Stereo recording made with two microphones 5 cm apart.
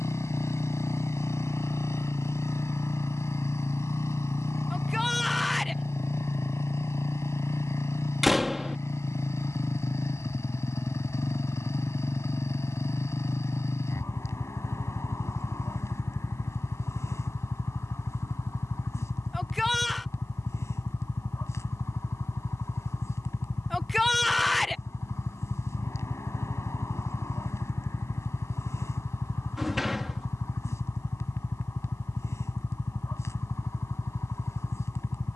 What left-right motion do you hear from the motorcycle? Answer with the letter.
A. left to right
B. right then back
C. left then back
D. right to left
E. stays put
E.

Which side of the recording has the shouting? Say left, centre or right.
centre.